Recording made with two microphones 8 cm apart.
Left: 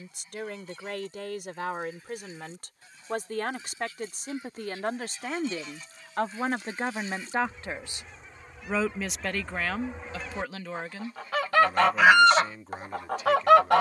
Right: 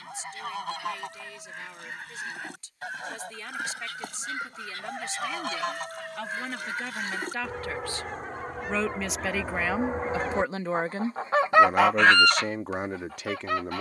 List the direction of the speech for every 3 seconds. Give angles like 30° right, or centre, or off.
60° left, 50° left, 30° left, 20° right, 60° right.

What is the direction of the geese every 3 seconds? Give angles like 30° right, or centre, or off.
70° right, 60° right, 60° right, 40° right, 50° left.